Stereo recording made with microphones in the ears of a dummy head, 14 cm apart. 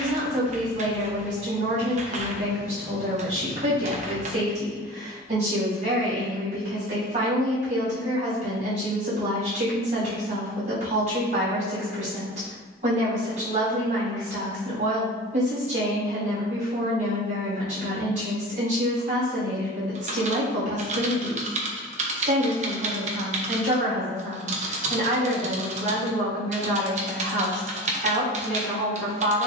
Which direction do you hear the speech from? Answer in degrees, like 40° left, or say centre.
50° right.